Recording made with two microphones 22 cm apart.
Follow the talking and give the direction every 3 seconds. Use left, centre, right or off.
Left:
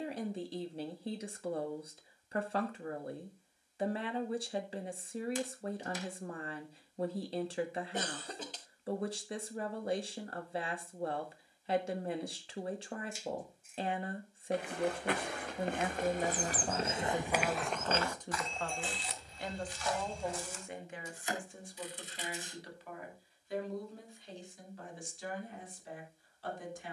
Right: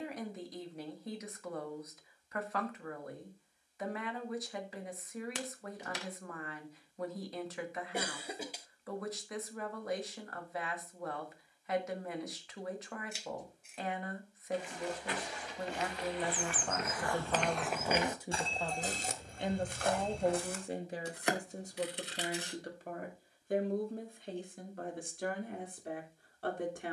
left, left, left, left, left, centre, right, right, right.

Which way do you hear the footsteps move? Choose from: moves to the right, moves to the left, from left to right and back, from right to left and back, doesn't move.
moves to the right.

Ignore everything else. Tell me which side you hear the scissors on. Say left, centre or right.
right.